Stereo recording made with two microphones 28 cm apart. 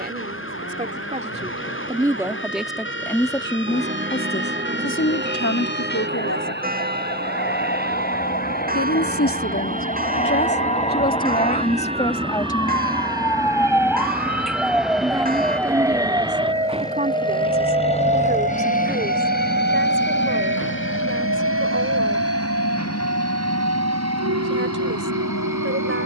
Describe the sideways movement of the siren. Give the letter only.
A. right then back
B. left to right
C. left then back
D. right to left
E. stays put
B.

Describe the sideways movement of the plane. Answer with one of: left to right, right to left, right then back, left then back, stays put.
right to left.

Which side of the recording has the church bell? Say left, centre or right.
right.